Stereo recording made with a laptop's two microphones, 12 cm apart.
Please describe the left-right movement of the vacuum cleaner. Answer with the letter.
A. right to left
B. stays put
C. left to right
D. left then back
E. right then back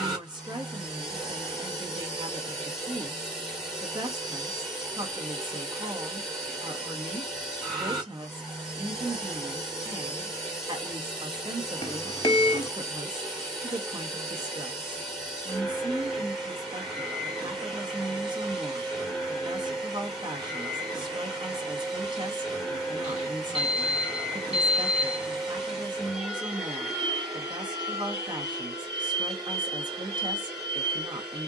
B.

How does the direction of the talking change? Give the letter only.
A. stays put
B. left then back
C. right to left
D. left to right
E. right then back
A.